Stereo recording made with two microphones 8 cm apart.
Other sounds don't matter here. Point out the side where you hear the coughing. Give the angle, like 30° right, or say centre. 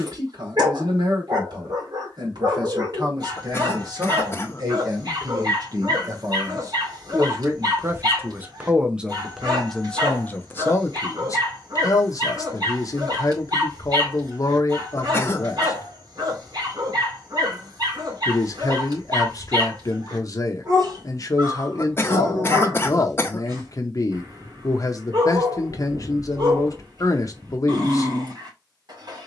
30° left.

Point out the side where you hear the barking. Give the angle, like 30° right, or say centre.
60° right.